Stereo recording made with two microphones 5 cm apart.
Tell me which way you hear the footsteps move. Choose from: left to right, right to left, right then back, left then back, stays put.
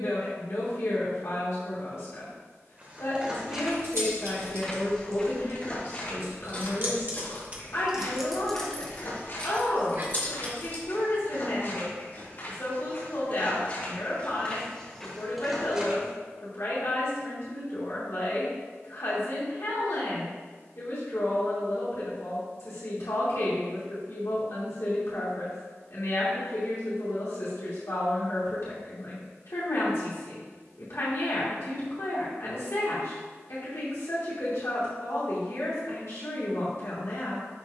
left then back.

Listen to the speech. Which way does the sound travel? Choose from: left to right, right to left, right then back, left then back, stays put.
stays put.